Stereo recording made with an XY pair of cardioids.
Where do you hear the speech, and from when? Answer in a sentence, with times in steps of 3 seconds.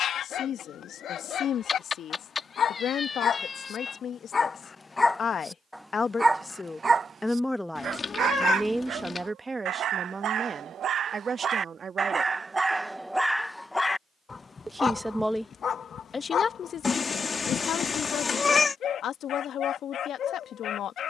You can hear the speech on the left from 0 s, in the centre from 6 s, on the right from 9 s and on the left from 15 s.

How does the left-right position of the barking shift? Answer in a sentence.
You can hear the barking move from left to right and back again.